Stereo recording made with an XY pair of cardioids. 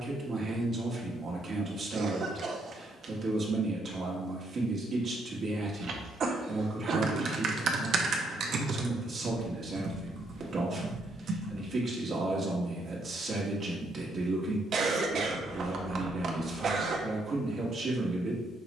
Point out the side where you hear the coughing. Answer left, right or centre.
right.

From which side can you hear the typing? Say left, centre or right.
right.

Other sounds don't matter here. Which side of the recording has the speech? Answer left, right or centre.
right.